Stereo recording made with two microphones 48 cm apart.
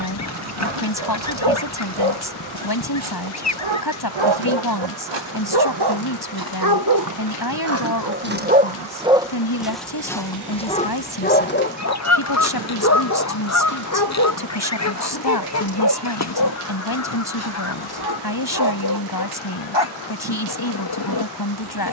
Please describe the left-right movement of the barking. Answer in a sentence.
In this clip you hear the barking move from right to left.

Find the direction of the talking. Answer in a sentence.
In this clip you hear the talking on the left.